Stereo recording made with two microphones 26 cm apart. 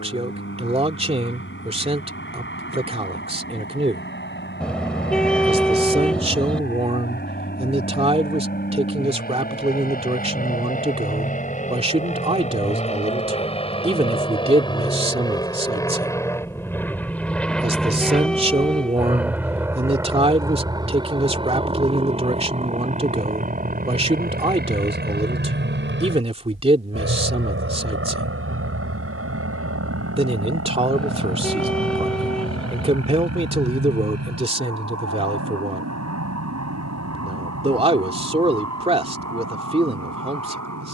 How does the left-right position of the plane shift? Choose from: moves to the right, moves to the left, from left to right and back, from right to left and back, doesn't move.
moves to the right.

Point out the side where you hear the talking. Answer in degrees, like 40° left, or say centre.
20° right.